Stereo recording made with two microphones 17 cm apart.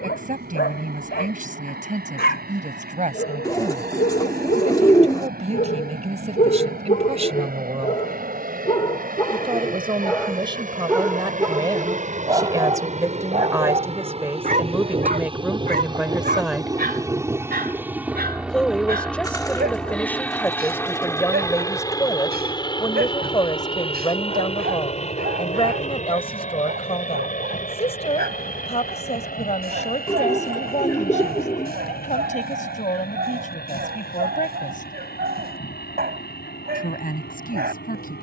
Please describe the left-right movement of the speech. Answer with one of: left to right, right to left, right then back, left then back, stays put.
right to left.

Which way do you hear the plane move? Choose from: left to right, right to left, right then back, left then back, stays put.
right to left.